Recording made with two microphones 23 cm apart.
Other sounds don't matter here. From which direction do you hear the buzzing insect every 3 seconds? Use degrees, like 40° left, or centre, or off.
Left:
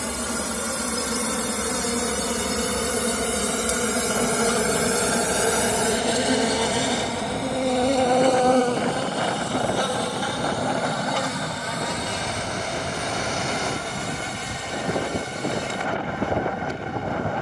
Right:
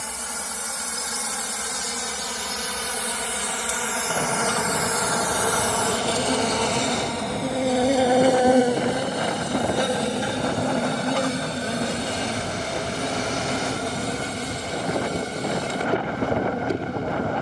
60° left, 40° left, centre, 20° right, 40° right, 40° right.